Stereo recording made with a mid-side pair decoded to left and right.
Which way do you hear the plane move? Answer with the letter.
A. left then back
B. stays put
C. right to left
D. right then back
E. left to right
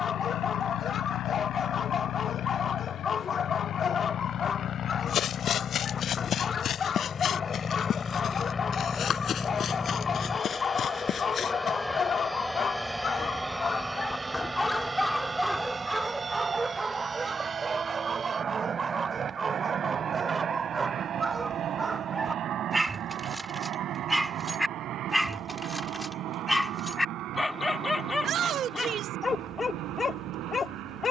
E.